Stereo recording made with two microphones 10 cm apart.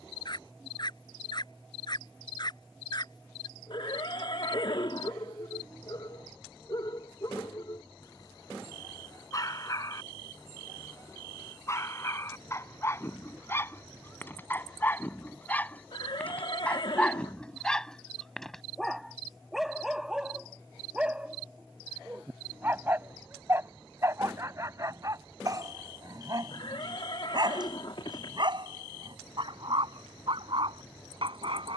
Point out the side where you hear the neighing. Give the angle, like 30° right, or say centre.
60° left.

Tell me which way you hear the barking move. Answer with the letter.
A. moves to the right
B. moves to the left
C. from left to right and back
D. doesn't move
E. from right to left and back
A.